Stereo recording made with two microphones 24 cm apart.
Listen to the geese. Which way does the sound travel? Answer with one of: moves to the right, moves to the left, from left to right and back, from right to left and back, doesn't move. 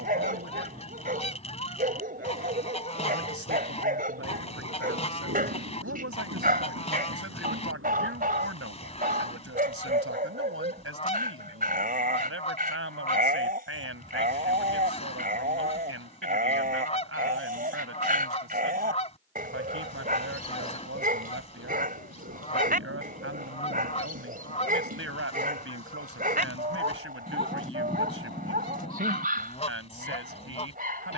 doesn't move.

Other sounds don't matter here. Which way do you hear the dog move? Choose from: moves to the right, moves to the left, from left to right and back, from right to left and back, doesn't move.
doesn't move.